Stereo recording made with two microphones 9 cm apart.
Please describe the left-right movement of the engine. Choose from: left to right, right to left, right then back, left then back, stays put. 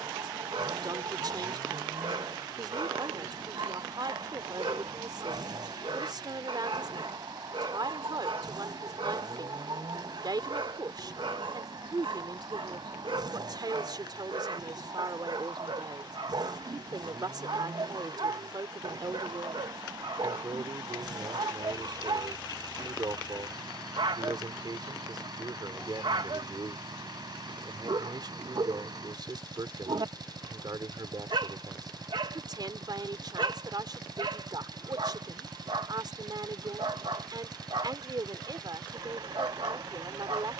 stays put.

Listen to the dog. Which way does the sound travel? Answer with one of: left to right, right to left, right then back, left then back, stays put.
stays put.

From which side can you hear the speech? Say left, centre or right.
right.